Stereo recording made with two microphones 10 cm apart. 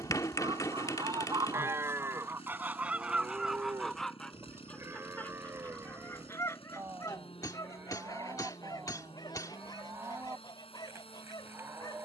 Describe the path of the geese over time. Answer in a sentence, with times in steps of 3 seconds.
In this clip you hear the geese on the right from 0 s, in the centre from 3 s and on the left from 6 s.